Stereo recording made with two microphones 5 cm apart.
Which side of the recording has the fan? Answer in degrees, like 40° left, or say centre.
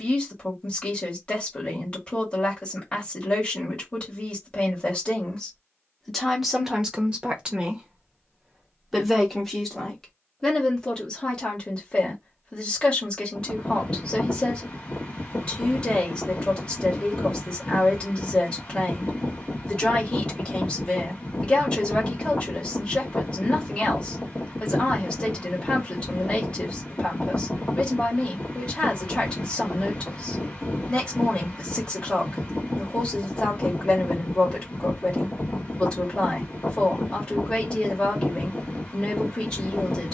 30° left.